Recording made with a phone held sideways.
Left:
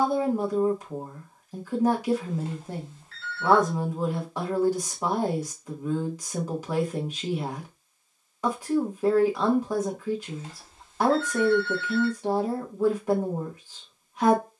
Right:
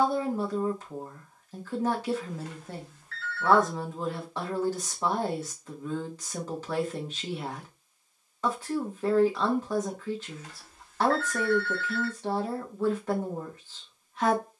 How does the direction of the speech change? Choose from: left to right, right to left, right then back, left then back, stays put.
stays put.